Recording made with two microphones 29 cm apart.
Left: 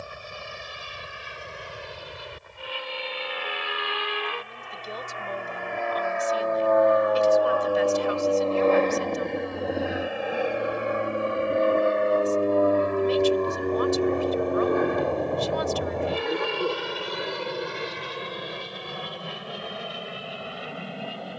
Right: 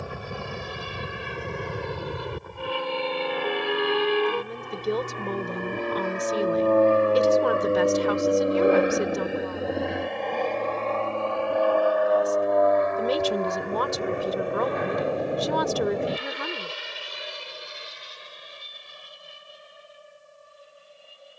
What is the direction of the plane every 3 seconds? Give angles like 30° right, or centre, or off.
70° right, 50° right, 30° right, 10° left, 40° left, 50° left, 60° left.